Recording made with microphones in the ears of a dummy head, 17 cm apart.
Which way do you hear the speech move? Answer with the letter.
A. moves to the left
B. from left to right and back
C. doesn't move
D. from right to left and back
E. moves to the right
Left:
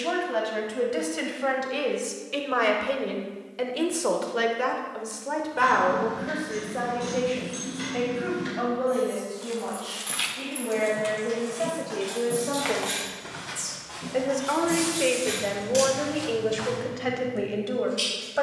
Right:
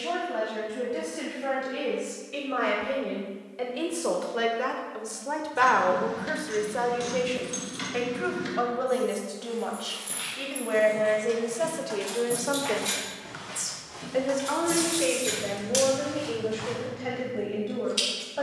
B.